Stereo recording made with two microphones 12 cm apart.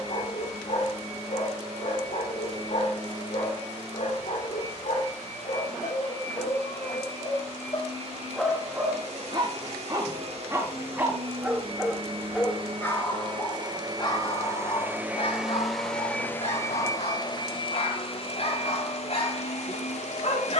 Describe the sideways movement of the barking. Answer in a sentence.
In this clip you hear the barking move from left to right and back again.